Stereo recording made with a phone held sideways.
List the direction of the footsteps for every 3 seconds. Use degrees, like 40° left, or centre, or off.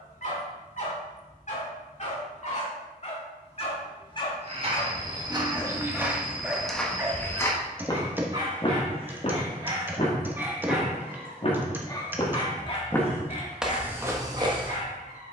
off, 30° right, 10° left, 50° left, 10° right.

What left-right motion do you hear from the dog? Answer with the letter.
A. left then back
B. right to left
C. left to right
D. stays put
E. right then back
E.